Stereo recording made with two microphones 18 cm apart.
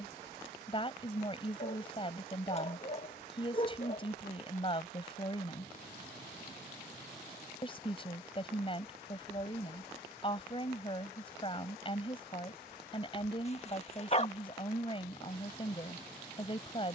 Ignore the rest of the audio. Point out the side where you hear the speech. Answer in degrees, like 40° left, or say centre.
30° left.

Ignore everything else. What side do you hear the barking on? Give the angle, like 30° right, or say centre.
40° left.